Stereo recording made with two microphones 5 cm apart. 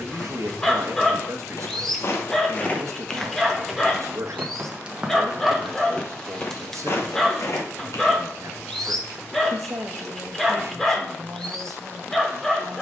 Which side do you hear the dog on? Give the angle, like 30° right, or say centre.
10° left.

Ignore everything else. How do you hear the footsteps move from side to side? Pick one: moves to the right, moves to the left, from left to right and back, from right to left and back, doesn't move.
from left to right and back.